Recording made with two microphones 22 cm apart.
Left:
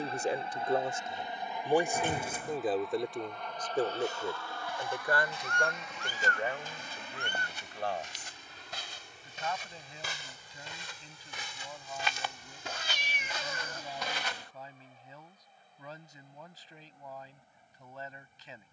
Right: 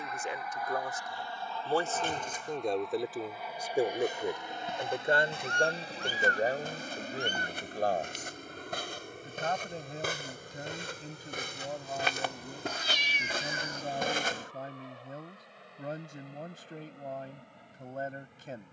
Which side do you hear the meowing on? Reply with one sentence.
You can hear the meowing on the left.